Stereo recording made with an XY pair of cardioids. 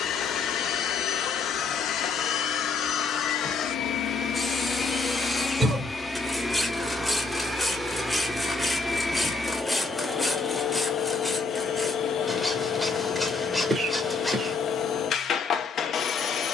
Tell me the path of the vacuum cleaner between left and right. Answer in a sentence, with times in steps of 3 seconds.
In this clip you hear the vacuum cleaner on the left from 0 s, in the centre from 6 s and on the left from 9 s.